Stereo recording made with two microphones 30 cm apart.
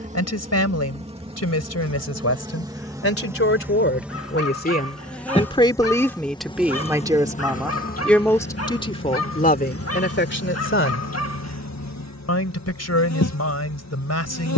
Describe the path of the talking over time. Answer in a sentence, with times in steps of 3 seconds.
In this clip you hear the talking on the left from 0 s, in the centre from 6 s and on the left from 9 s.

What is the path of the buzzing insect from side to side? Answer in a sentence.
You can hear the buzzing insect move from right to left.